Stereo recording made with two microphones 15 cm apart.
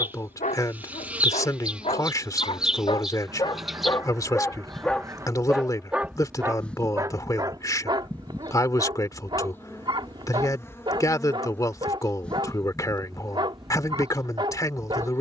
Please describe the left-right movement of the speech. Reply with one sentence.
You can hear the speech stay in one place.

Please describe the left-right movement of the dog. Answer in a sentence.
In this clip you hear the dog move to the right.